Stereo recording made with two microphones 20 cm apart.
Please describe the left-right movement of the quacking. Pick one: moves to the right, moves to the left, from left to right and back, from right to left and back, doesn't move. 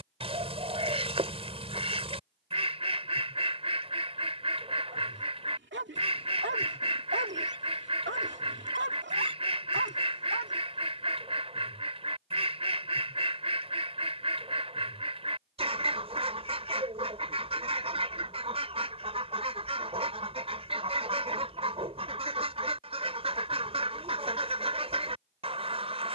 doesn't move.